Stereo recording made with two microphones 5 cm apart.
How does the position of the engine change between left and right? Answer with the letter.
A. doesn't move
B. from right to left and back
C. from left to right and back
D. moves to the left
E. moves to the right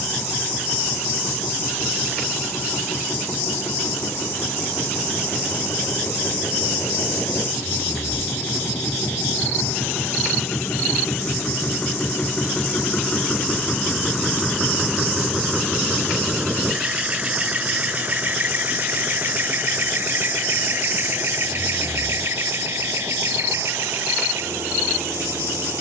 E.